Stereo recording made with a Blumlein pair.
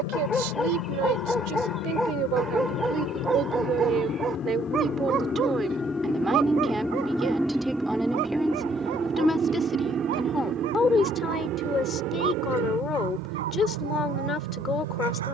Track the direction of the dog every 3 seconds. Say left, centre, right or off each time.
centre, right, right, right, right.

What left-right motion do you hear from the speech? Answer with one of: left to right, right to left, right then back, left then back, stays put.
right to left.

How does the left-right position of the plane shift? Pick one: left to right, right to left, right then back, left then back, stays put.
left to right.